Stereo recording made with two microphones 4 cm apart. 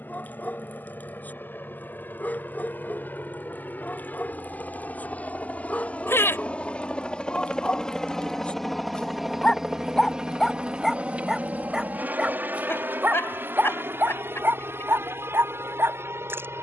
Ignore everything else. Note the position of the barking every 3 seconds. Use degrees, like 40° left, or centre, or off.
40° left, 40° left, 30° left, centre, 50° right, 70° right.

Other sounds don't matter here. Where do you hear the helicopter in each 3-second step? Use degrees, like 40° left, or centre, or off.
60° left, 40° left, 20° left, 20° right, 50° right, 70° right.